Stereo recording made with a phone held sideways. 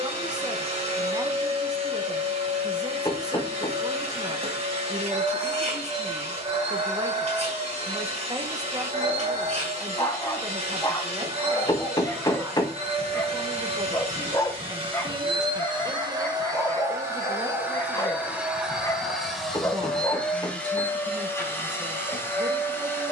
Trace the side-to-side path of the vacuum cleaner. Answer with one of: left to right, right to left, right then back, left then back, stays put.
right to left.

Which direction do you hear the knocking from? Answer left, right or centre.
left.